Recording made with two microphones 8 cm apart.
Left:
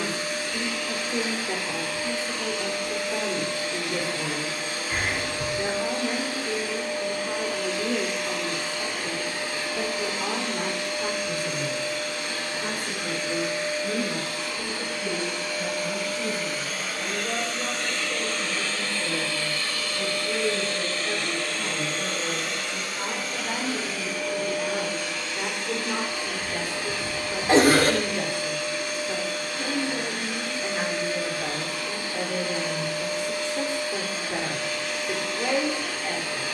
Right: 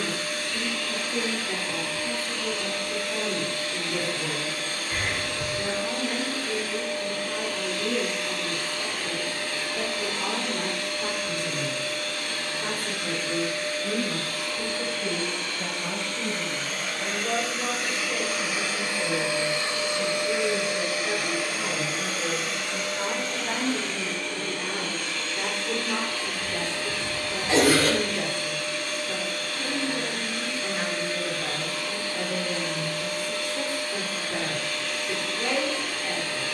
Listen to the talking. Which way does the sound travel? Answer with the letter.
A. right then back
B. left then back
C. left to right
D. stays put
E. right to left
A.